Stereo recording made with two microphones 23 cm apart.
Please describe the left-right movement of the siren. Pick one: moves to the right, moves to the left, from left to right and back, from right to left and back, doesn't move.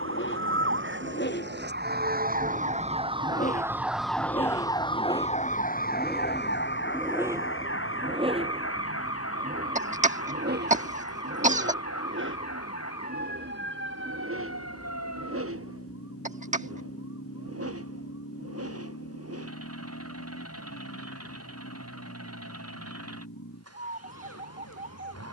moves to the left.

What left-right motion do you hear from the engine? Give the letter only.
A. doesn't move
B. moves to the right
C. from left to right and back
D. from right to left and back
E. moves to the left
B.